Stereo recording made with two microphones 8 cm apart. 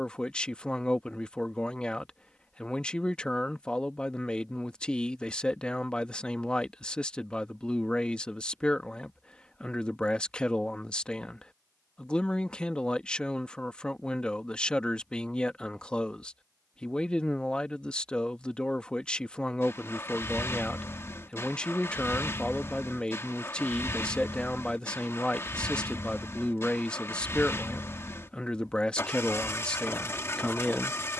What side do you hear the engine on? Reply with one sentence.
You can hear the engine on the left.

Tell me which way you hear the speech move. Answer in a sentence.
In this clip you hear the speech stay in one place.